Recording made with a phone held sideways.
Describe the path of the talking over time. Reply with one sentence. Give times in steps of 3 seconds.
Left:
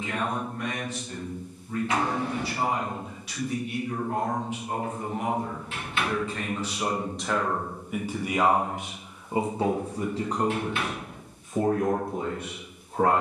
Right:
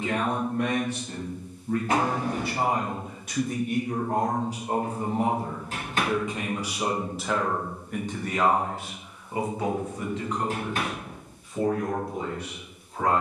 You can hear the talking on the right from 0 s, in the centre from 6 s and on the left from 9 s.